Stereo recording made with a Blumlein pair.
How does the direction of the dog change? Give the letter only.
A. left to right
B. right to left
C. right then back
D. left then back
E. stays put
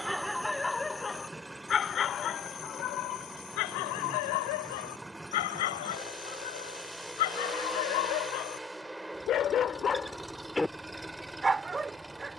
D.